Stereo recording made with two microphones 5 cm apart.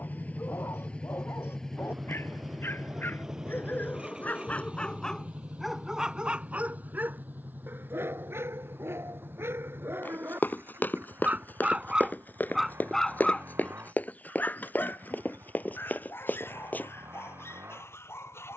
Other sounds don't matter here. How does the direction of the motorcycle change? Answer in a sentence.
You can hear the motorcycle move to the right.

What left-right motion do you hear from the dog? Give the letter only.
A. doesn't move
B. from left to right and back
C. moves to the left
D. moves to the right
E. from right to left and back
B.